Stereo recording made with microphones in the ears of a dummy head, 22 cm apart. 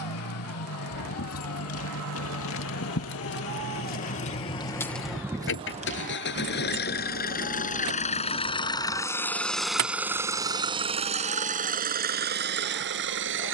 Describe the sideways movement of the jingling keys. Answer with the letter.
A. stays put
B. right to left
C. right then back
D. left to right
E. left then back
D.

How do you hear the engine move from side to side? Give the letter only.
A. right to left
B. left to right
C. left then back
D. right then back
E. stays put
B.